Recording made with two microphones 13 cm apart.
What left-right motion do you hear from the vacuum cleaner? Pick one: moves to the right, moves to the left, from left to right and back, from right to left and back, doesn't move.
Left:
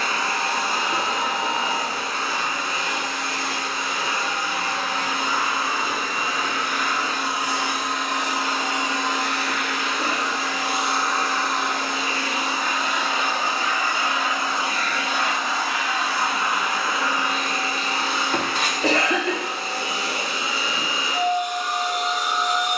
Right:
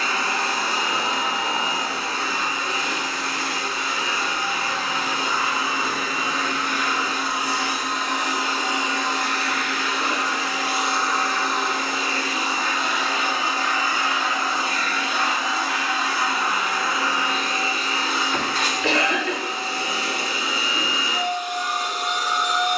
doesn't move.